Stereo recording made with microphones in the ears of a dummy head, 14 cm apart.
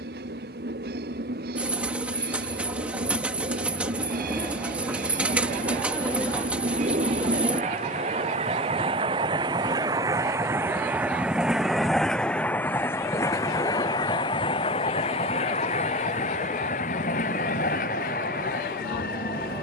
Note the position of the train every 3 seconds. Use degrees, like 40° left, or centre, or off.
70° right, 60° right, 50° right, 20° right, 20° left, 50° left, 60° left.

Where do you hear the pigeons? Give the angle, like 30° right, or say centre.
10° right.